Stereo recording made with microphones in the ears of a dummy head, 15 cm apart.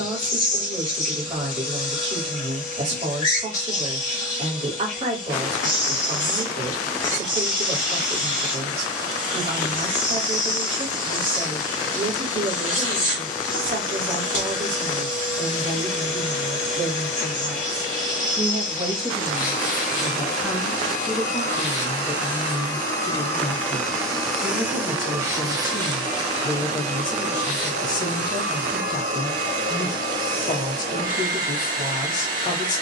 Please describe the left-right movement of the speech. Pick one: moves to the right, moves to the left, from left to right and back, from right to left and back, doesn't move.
moves to the left.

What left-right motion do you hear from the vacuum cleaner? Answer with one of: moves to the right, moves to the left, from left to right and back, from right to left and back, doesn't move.
moves to the right.